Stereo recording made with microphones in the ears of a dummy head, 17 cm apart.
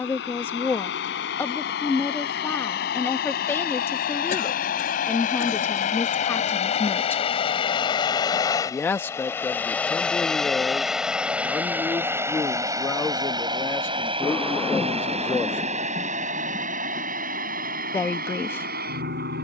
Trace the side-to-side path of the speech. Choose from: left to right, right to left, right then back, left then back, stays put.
stays put.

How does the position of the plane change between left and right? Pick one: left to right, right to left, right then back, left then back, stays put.
left to right.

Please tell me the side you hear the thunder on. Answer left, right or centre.
centre.